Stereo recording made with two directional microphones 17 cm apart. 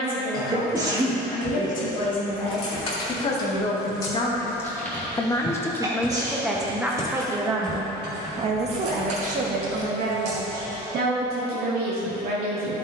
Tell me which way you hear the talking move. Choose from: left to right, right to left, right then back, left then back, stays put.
left to right.